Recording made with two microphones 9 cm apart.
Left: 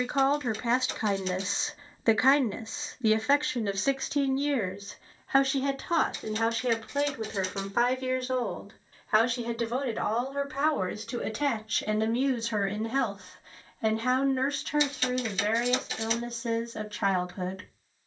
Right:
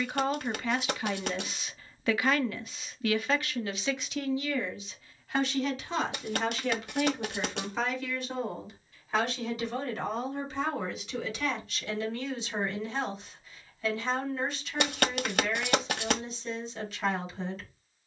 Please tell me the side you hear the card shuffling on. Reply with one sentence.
In this clip you hear the card shuffling on the right.